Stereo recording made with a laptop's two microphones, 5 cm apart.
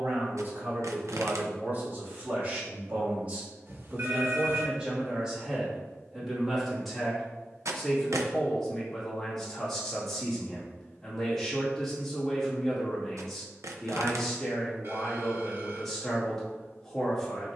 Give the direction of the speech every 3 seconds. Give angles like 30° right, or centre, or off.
40° right, 20° right, centre, 10° left, 10° left, 10° left.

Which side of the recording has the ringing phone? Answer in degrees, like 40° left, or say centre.
50° right.